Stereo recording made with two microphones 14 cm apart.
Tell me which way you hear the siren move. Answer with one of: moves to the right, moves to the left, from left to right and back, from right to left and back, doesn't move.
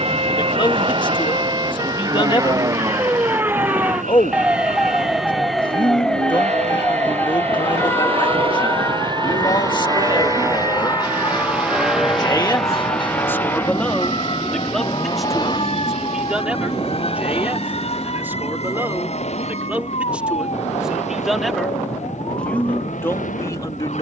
moves to the left.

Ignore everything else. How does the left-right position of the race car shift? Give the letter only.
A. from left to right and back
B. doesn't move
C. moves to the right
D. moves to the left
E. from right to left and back
D.